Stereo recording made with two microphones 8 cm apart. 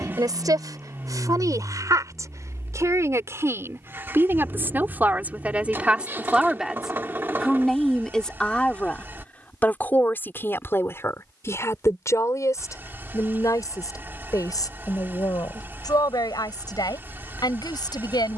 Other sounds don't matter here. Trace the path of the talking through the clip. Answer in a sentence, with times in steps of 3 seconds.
In this clip you hear the talking on the right from 0 s, in the centre from 6 s and on the left from 9 s.